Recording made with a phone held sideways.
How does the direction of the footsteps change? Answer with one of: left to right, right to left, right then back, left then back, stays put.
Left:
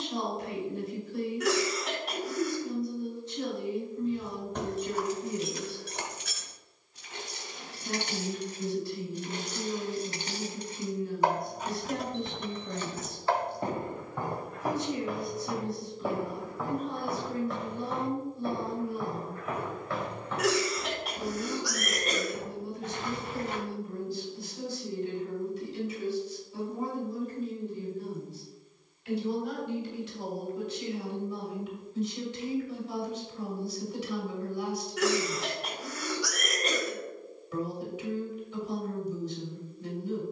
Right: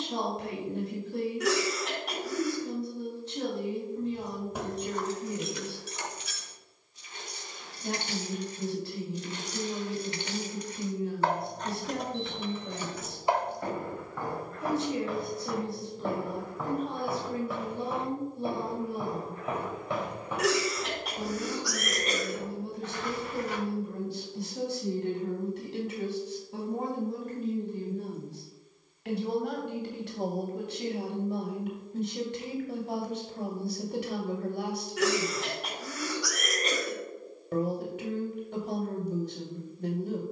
right then back.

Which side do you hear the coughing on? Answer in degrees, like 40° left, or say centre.
centre.